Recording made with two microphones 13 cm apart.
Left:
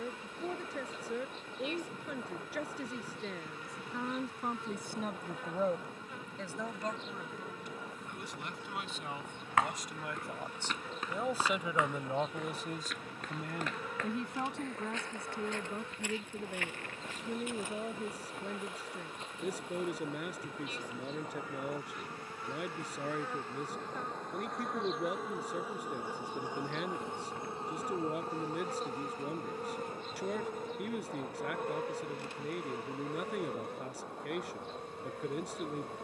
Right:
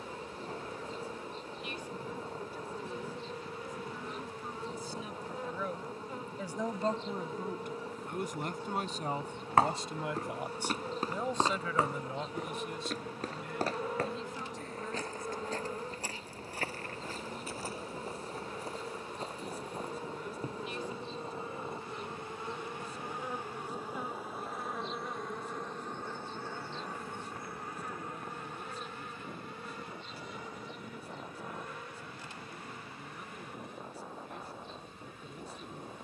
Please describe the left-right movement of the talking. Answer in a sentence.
In this clip you hear the talking move from left to right and back again.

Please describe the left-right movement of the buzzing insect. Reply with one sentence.
You can hear the buzzing insect travel towards the left.